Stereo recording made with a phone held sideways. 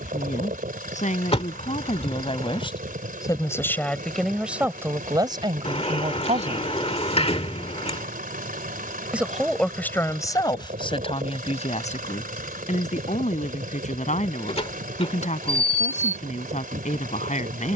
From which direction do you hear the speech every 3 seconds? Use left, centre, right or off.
left, centre, right, left, left, left.